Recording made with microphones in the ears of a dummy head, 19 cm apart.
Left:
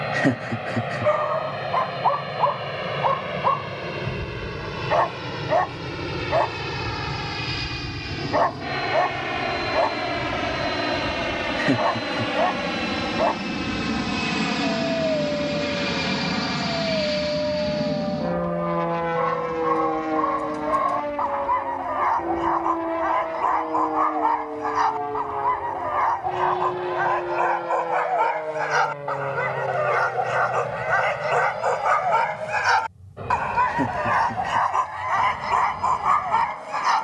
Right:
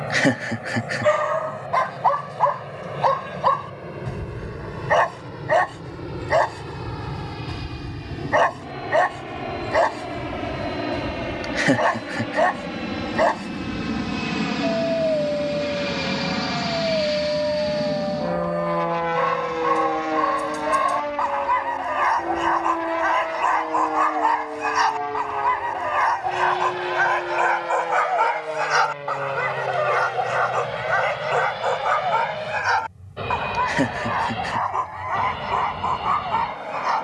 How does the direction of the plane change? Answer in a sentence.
You can hear the plane travel towards the right.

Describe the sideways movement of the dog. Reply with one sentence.
You can hear the dog move to the left.